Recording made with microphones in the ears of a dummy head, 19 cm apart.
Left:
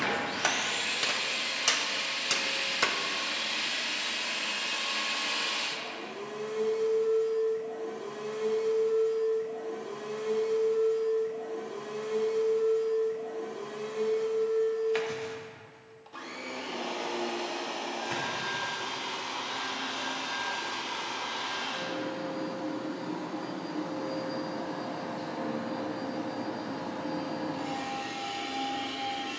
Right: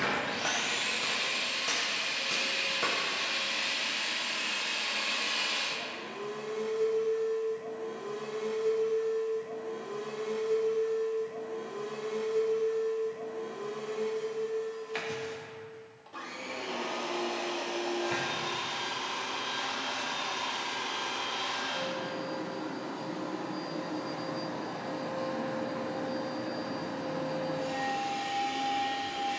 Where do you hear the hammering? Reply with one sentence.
You can hear the hammering on the left.